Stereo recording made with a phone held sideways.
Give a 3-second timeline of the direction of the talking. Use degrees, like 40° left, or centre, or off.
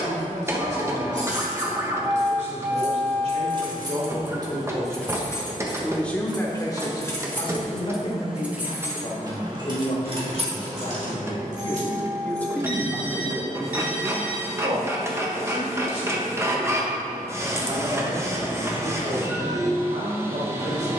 50° right, 30° right, 40° left, 50° left, 20° right, 50° right, 60° right.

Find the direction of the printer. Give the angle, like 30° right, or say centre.
20° right.